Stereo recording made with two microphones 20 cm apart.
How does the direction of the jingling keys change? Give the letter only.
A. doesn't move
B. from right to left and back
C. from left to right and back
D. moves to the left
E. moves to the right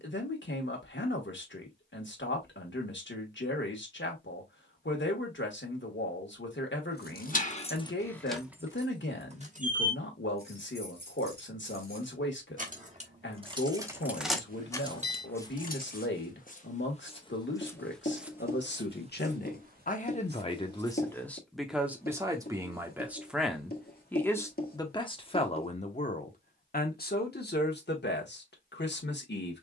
C.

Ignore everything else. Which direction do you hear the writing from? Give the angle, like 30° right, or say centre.
50° left.